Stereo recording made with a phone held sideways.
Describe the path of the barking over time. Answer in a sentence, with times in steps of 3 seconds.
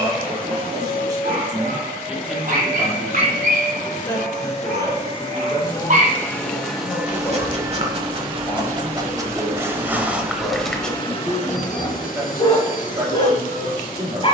You can hear the barking on the right from 0 s, in the centre from 9 s and on the left from 12 s.